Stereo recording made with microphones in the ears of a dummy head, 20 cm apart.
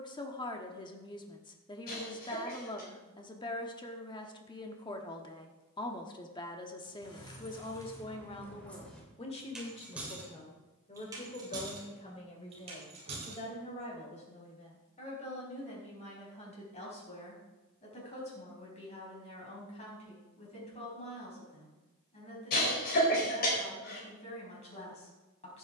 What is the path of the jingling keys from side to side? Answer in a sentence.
You can hear the jingling keys move from left to right.